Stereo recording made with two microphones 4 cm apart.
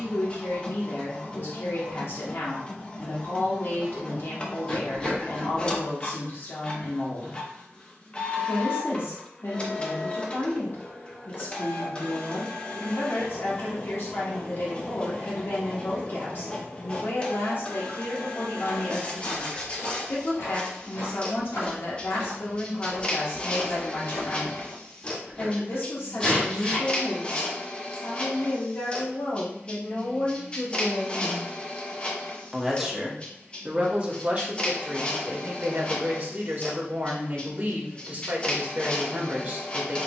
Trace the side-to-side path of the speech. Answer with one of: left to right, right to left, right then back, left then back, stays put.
left to right.